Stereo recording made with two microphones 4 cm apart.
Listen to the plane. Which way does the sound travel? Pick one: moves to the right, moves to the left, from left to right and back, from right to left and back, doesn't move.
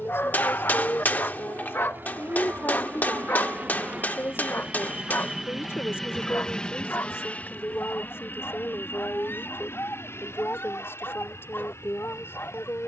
moves to the left.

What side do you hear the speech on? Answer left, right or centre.
left.